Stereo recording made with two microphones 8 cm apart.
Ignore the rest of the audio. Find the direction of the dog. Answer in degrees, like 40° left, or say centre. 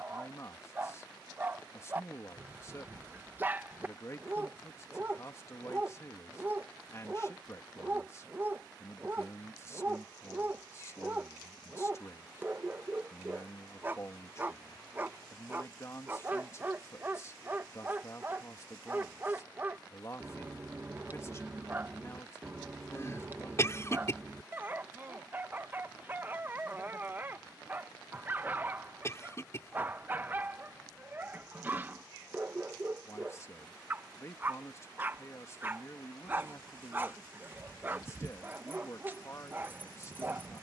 20° right.